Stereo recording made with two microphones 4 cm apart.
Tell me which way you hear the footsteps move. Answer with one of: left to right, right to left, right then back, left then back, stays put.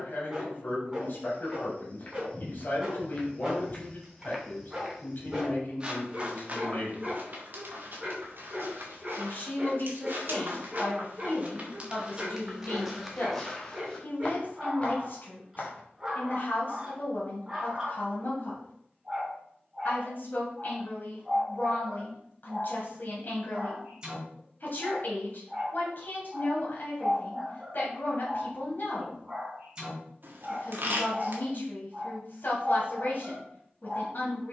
right then back.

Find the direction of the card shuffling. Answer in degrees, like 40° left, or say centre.
60° right.